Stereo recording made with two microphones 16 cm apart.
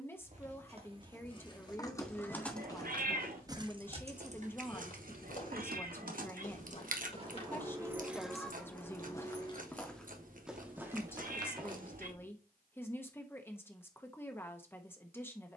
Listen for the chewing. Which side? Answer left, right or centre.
right.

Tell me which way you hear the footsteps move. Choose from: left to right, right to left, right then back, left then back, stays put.
left then back.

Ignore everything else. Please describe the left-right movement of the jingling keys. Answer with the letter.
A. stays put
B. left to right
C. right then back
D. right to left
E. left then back
C.